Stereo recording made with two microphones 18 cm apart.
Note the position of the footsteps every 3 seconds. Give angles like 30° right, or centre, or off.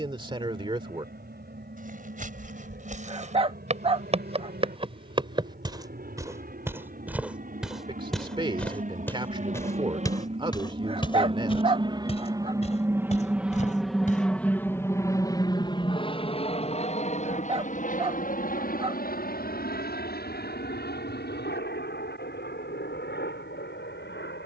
50° right, 30° right, centre, 20° left, 40° left, off, off, off.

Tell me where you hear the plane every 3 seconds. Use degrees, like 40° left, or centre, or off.
70° right, 70° right, 60° right, 40° right, 10° right, 30° left, 50° left, 70° left.